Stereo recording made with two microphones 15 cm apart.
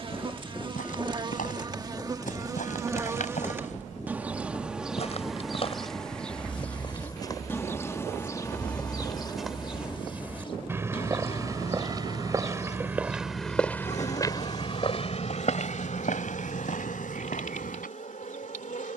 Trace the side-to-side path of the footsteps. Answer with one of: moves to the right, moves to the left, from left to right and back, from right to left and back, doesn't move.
from left to right and back.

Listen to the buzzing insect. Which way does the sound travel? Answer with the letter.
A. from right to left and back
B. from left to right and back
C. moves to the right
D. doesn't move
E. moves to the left
E.